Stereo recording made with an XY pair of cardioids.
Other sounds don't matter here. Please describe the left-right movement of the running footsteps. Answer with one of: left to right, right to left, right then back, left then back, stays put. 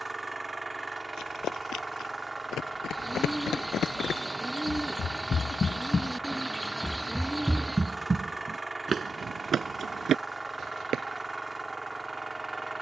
left to right.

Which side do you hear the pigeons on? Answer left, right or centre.
centre.